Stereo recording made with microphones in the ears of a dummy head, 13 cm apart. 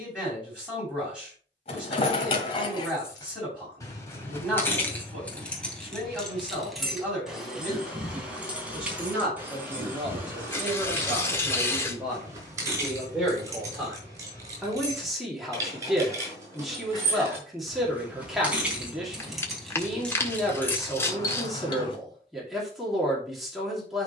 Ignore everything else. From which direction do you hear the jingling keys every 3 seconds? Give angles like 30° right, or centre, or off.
40° left, 20° left, centre, 20° right, 20° right, 20° right, centre, 30° left.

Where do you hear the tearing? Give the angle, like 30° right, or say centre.
20° left.